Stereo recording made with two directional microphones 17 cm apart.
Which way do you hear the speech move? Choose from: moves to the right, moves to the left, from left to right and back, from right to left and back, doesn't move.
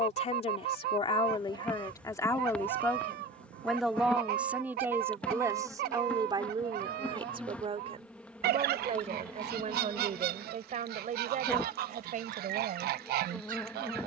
moves to the right.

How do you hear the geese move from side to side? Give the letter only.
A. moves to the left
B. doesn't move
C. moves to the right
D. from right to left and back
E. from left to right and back
B.